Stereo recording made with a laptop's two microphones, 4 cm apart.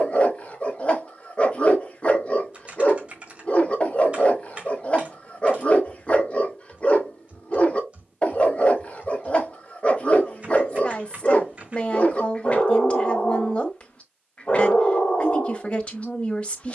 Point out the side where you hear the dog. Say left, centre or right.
left.